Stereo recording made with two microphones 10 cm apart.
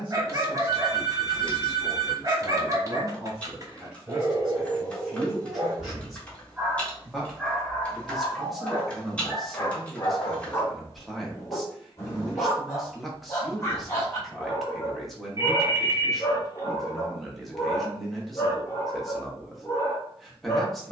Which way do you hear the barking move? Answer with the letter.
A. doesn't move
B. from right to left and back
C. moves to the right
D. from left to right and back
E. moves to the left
E.